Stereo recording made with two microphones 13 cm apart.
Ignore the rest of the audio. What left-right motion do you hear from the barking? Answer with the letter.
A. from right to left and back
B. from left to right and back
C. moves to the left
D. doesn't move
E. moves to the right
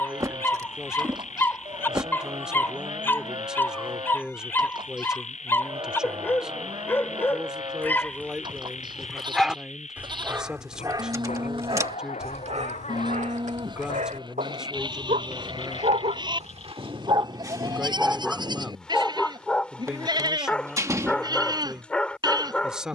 B.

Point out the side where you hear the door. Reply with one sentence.
You can hear the door on the right.